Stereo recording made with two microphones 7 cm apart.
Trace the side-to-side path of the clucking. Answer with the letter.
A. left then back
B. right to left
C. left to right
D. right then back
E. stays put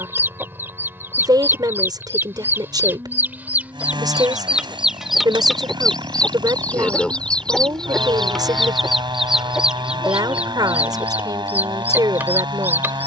A.